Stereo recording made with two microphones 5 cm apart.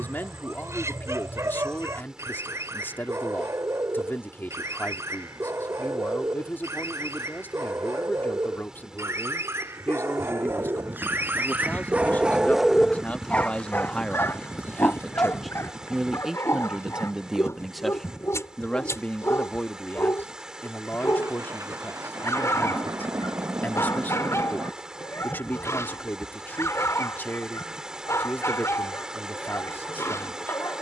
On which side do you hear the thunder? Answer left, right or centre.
right.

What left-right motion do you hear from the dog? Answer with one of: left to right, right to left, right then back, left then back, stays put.
right to left.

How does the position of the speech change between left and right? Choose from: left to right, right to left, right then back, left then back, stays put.
right then back.